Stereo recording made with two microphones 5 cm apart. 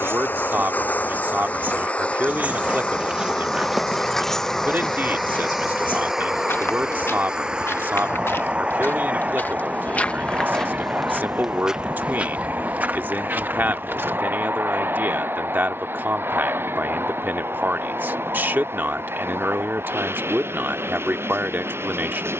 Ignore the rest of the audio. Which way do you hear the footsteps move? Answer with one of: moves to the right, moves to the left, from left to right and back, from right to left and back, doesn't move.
from right to left and back.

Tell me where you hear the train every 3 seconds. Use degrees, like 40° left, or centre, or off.
30° left, 10° left, 20° right, 30° right, 40° right, 50° right, 50° right, 50° right.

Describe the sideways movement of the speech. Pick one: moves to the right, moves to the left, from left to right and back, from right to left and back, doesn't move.
doesn't move.